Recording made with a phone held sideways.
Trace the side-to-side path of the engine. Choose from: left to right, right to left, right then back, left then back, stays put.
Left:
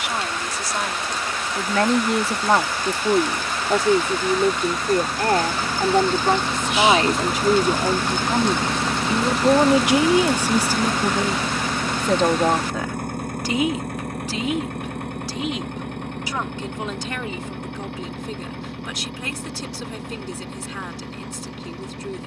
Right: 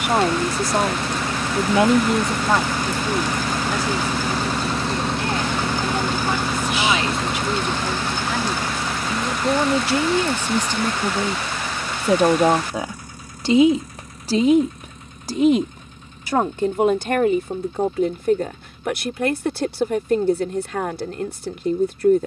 right to left.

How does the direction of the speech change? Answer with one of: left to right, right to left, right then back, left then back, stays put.
left then back.